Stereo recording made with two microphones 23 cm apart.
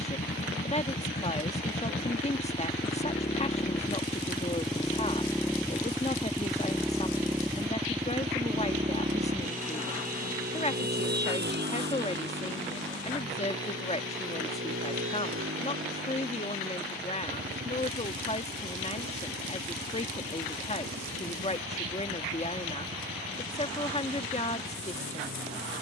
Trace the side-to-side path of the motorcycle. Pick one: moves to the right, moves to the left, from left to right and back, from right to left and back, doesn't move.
moves to the right.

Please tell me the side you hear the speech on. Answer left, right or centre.
left.